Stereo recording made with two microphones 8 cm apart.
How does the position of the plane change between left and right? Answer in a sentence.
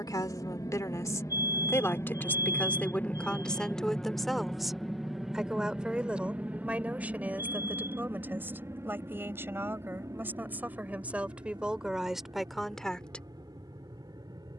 You can hear the plane move from left to right.